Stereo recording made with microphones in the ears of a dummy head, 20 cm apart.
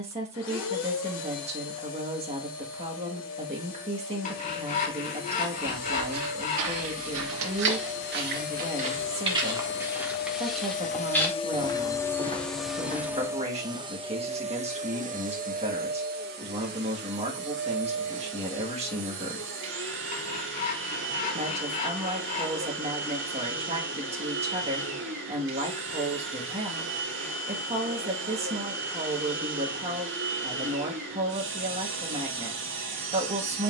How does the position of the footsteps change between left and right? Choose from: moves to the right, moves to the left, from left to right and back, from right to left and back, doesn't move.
moves to the left.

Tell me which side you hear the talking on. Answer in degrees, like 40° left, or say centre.
30° right.